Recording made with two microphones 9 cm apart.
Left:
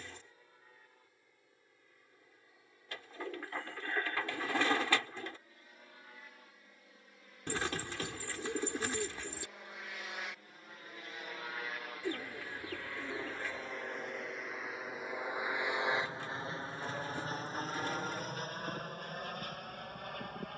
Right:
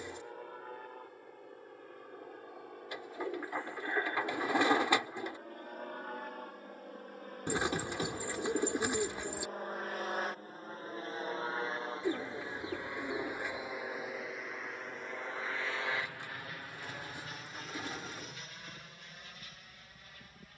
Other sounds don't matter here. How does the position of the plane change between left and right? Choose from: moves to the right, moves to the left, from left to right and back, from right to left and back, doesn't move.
moves to the left.